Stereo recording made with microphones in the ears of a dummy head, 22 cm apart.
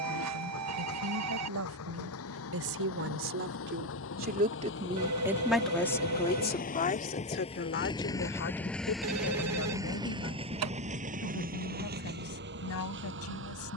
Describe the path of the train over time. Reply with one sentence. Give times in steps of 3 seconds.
In this clip you hear the train on the left from 0 s and on the right from 9 s.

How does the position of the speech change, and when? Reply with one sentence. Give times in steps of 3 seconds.
You can hear the speech on the right from 0 s and on the left from 6 s.